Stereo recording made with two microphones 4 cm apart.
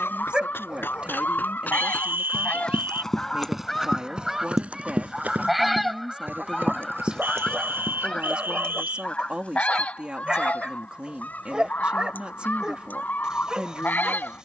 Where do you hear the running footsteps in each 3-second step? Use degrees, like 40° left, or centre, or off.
40° left, 20° right, 50° right, off, off.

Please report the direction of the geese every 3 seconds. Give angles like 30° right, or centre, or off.
40° left, centre, 20° left, 40° left, 40° left.